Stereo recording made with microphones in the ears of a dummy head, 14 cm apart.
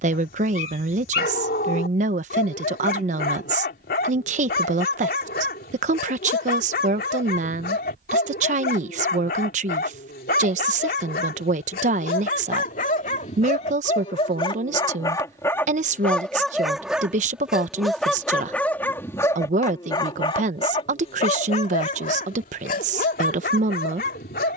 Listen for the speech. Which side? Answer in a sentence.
In this clip you hear the speech on the right.